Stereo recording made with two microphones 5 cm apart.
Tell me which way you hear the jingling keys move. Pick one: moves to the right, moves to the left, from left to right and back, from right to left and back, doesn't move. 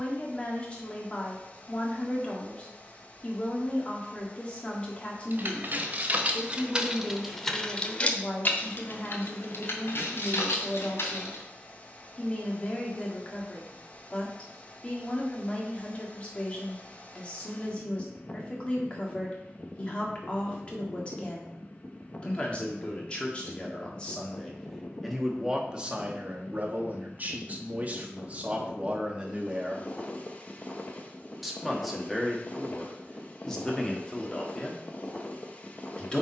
moves to the left.